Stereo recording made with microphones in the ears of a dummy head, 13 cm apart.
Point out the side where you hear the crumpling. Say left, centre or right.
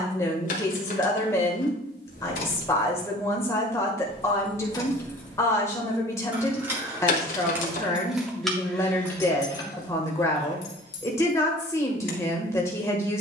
left.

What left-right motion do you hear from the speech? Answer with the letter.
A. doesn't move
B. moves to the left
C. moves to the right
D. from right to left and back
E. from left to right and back
A.